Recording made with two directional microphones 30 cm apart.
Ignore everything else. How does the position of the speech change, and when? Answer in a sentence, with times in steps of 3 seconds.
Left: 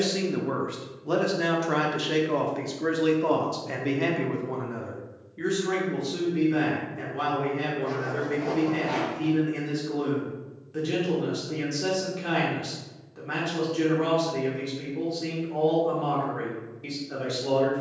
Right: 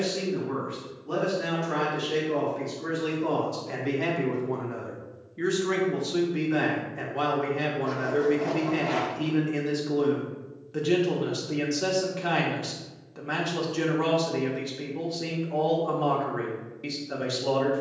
You can hear the speech on the left from 0 s, in the centre from 3 s and on the right from 6 s.